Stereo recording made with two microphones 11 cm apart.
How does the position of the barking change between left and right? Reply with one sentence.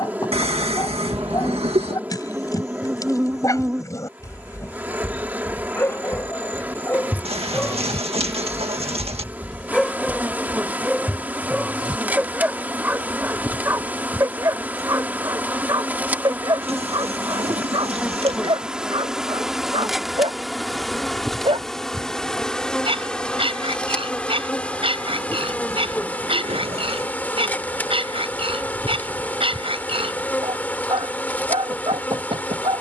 In this clip you hear the barking move to the right.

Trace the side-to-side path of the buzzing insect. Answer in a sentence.
In this clip you hear the buzzing insect go from the right side to the left.